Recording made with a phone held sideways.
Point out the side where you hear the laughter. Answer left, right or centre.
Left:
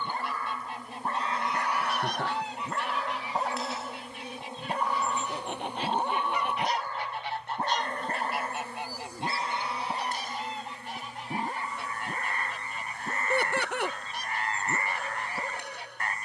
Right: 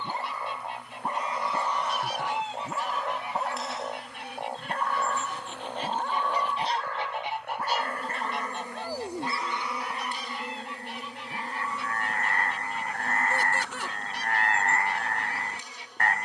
left.